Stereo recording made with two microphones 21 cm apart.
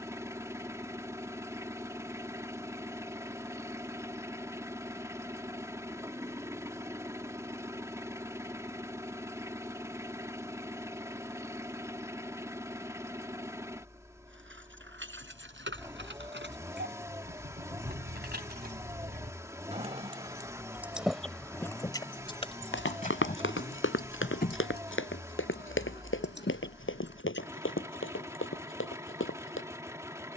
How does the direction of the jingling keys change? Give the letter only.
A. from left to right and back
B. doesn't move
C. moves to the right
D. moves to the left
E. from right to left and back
D.